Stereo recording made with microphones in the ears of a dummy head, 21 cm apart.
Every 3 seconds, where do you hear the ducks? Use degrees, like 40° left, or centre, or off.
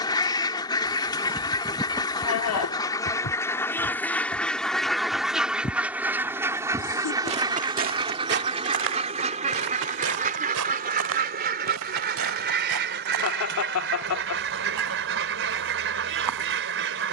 20° left, centre, 20° right, 30° right, 50° right, 50° right.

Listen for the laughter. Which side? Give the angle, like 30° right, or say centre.
60° left.